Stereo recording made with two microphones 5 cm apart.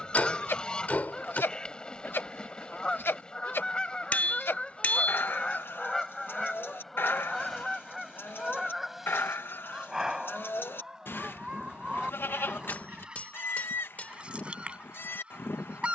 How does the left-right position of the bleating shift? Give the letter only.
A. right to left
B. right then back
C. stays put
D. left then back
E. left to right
C.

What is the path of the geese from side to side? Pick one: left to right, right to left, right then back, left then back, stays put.
left to right.